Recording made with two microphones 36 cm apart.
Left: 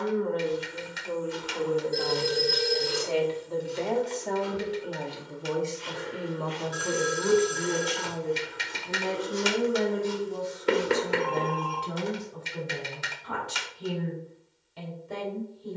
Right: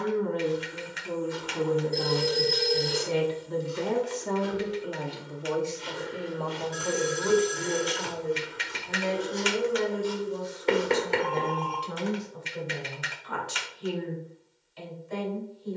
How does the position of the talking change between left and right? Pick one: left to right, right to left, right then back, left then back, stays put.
right to left.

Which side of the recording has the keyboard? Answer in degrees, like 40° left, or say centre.
50° left.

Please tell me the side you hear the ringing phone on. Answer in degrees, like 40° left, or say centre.
20° left.